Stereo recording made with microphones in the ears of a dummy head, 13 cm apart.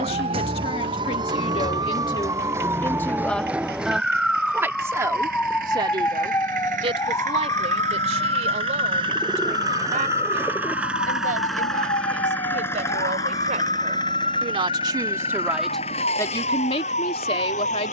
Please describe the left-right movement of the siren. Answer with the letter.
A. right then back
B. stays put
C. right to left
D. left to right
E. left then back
C.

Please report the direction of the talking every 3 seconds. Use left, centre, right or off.
left, centre, right, right, right, left.